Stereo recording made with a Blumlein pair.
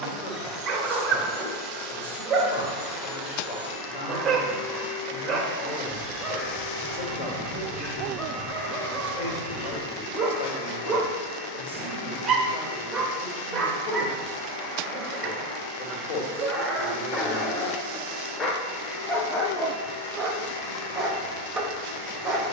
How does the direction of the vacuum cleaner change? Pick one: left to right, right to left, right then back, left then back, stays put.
right to left.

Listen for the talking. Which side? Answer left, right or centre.
left.